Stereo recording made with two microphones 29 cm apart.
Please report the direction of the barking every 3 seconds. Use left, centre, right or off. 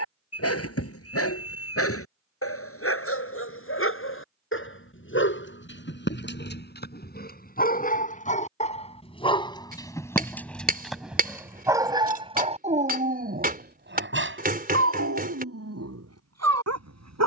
left, left, left, centre, right, right.